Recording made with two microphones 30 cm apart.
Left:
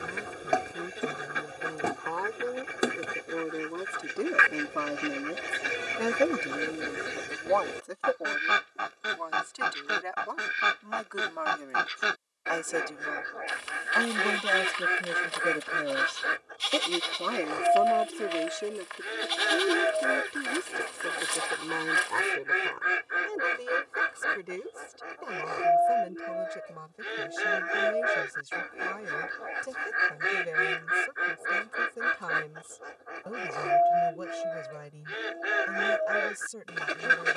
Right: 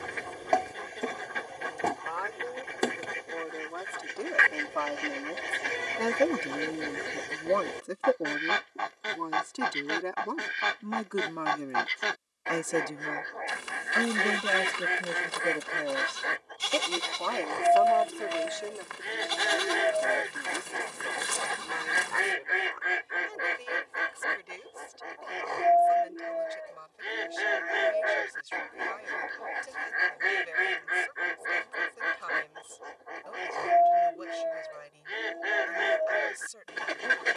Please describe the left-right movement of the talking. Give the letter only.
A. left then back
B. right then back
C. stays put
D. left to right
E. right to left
B.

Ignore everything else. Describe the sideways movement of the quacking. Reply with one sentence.
In this clip you hear the quacking stay in one place.